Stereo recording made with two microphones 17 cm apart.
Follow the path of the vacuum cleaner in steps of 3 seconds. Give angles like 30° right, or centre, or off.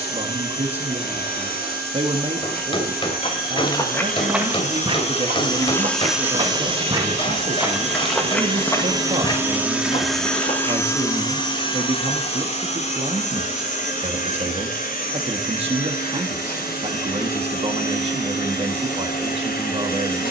70° left, 50° left, 30° right, 10° left, 50° left, 60° left, 60° left.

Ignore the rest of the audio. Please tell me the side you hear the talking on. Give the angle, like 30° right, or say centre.
40° right.